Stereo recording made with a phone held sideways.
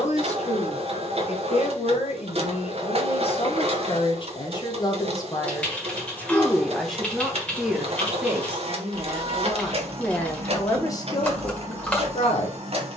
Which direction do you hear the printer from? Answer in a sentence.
You can hear the printer on the right.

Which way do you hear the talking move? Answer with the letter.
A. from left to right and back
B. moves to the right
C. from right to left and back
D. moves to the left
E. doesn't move
A.